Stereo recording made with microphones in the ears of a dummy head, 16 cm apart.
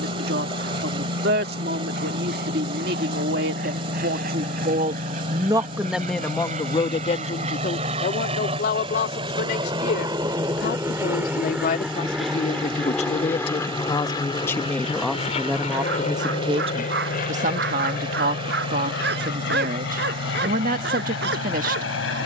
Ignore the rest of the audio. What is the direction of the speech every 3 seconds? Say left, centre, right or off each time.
right, right, left, left, left, right, right, right.